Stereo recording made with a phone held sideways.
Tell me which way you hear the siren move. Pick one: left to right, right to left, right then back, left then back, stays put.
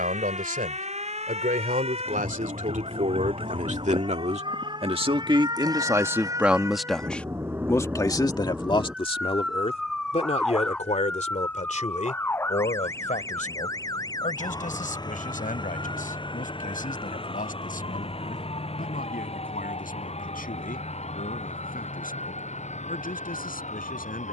right to left.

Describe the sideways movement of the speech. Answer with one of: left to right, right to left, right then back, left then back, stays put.
right to left.